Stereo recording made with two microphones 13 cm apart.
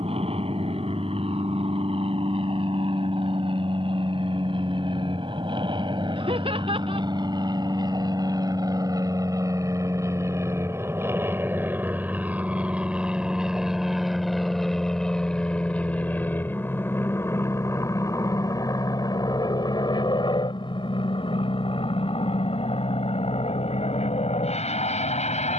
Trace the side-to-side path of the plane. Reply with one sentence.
In this clip you hear the plane go from the right side to the left.